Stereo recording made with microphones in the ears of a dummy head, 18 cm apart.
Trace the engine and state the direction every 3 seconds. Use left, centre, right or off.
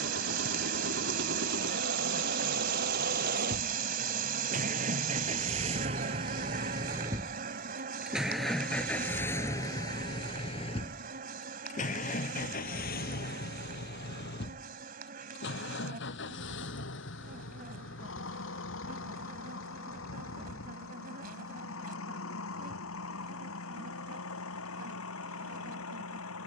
right, right, centre, left, left, left, left, left, left.